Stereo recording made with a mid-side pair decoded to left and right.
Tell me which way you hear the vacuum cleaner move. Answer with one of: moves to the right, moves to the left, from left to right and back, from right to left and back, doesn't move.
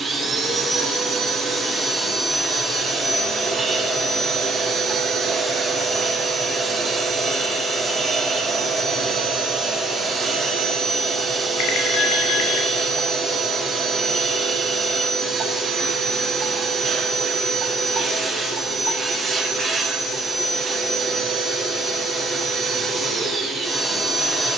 doesn't move.